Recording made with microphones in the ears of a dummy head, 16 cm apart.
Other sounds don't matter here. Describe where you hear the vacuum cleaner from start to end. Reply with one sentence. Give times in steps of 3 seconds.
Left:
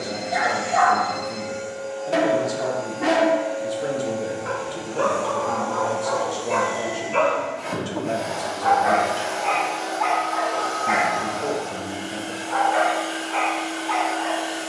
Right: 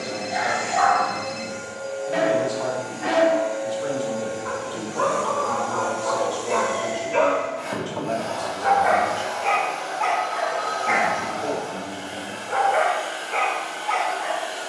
In this clip you hear the vacuum cleaner on the right from 0 s, in the centre from 6 s and on the left from 9 s.